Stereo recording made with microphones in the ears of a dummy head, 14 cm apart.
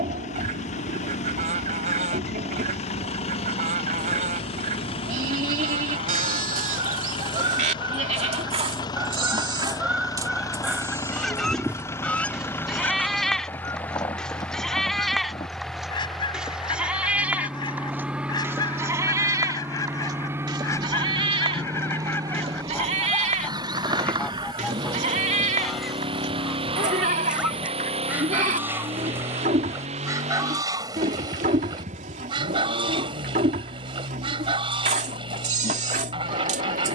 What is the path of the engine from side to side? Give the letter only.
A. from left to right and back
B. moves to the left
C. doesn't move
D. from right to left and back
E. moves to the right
E.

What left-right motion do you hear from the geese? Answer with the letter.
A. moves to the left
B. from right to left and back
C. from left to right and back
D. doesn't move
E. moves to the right
B.